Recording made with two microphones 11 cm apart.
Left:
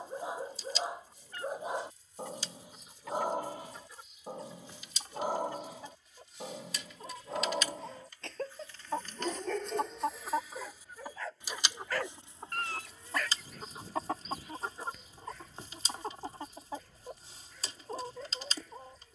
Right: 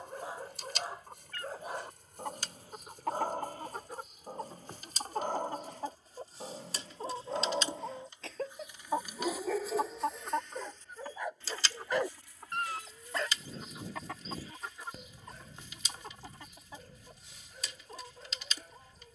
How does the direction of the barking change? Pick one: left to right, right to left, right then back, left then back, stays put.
left to right.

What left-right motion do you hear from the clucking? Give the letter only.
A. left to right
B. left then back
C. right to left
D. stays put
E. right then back
C.